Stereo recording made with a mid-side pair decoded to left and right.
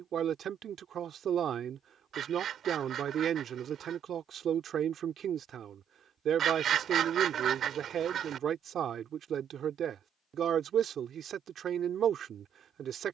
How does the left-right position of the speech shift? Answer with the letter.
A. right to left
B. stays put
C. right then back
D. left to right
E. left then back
B.